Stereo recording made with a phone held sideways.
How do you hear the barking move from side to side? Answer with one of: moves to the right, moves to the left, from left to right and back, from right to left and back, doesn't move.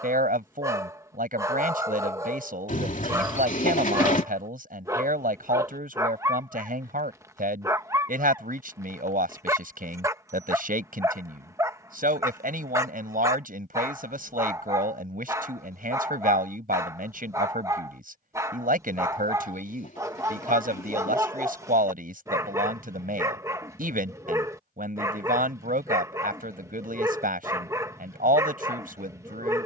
doesn't move.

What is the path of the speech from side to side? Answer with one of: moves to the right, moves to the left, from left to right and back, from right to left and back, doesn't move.
doesn't move.